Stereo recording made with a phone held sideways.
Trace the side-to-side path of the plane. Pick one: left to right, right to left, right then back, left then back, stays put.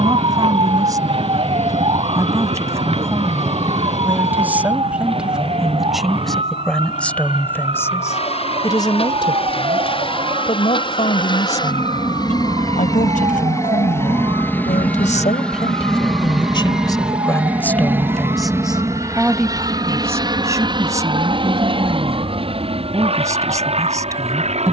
left to right.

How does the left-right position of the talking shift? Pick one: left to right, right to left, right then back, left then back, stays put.
left then back.